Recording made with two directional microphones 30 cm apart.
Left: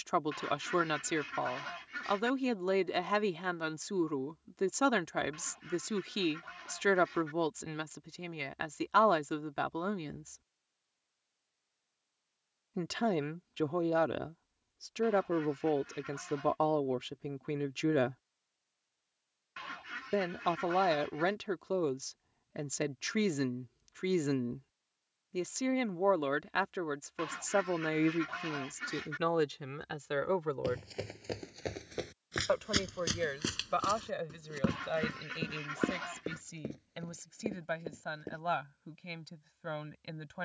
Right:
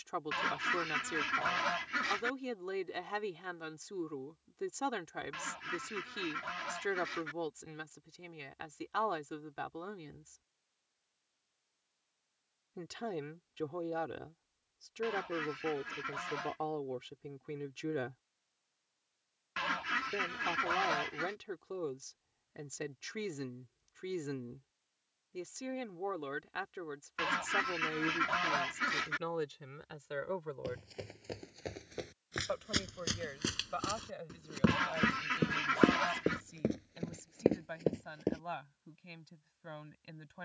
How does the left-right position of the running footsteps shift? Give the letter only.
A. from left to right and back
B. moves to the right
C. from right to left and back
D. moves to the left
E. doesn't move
B.